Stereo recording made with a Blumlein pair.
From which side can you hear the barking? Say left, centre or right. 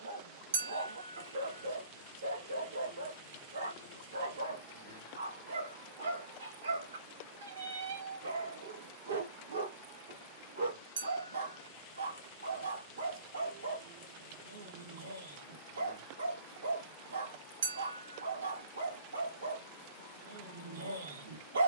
right.